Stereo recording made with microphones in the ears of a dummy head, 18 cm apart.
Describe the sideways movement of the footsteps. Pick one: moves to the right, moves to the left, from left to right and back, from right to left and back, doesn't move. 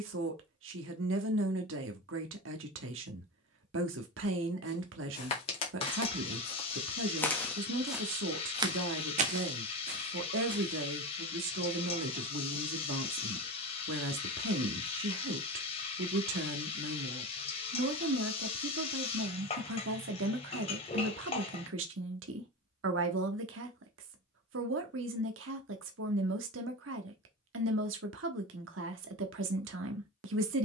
moves to the right.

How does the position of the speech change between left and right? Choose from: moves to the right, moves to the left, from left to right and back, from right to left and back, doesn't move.
doesn't move.